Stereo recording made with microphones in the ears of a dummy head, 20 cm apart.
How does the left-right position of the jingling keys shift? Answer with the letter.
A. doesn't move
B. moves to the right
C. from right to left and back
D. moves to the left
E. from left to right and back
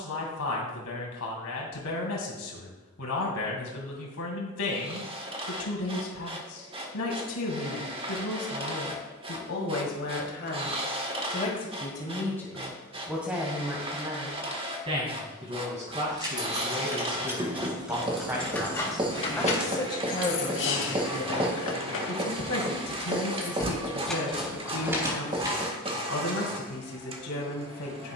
C.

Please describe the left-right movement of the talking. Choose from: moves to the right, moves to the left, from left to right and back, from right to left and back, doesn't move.
from left to right and back.